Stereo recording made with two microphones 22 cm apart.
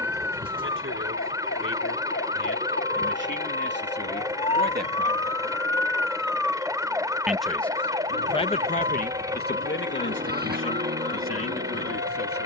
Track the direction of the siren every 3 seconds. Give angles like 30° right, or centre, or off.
50° left, 30° left, 20° right, 40° right.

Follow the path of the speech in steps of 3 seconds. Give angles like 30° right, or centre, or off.
60° right, 50° right, 20° left, 60° left.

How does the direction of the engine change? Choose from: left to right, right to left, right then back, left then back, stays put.
stays put.